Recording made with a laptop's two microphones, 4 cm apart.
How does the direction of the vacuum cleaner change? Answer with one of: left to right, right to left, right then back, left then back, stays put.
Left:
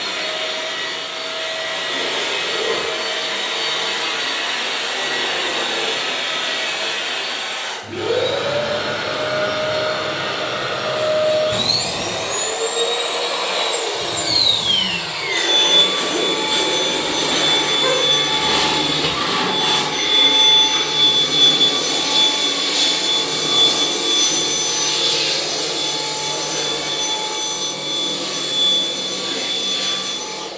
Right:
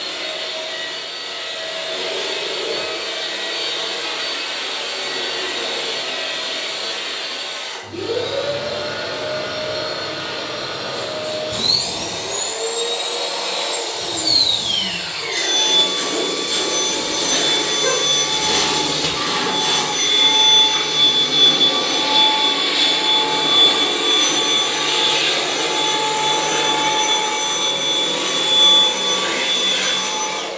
left to right.